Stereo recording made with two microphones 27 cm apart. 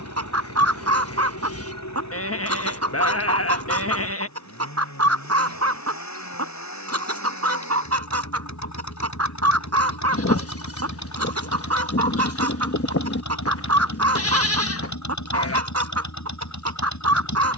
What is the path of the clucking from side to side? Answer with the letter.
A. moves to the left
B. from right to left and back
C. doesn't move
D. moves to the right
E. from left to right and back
C.